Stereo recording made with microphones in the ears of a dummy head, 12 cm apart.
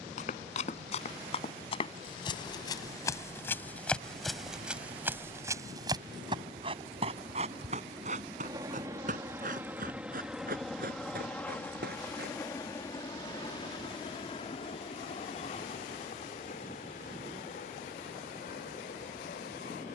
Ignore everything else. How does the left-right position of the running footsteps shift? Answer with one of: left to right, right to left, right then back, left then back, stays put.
left to right.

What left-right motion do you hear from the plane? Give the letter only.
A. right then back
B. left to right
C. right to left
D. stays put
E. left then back
C.